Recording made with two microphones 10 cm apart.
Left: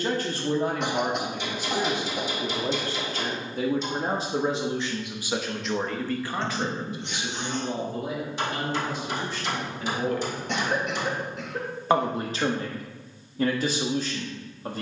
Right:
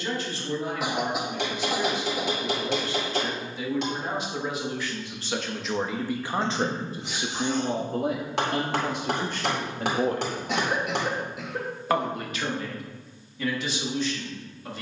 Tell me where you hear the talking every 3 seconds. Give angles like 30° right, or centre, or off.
50° left, 30° left, 40° right, 40° right, 40° left.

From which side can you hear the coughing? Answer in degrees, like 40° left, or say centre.
centre.